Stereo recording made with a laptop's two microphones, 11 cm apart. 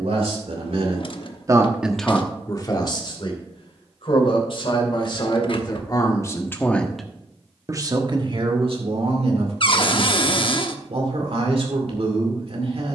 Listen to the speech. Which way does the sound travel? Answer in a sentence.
You can hear the speech move from right to left and back again.